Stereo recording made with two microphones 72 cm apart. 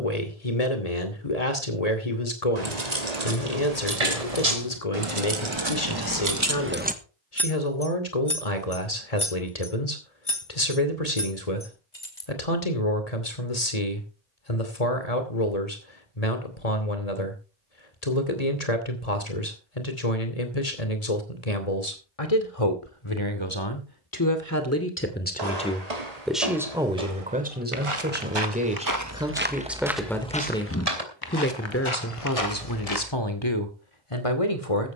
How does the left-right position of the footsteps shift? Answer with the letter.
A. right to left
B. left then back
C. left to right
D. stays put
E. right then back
A.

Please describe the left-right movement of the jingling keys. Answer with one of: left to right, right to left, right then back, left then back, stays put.
right to left.